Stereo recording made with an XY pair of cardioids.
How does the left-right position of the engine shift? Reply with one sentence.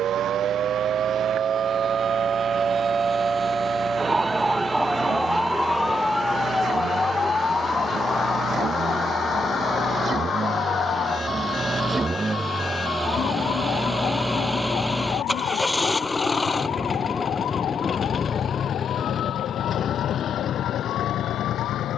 In this clip you hear the engine move to the left.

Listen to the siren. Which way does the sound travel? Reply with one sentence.
In this clip you hear the siren travel towards the left.